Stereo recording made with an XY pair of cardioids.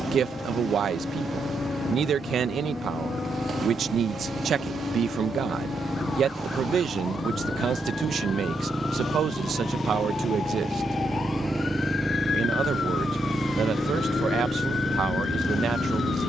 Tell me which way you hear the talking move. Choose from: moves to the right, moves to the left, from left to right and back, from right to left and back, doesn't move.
doesn't move.